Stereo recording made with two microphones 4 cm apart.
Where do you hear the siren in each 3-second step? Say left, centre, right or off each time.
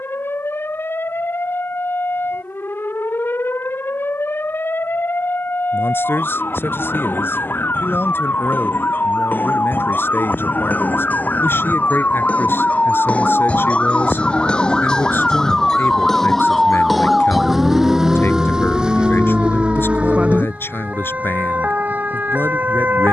left, left, left, left, left, centre, right, right.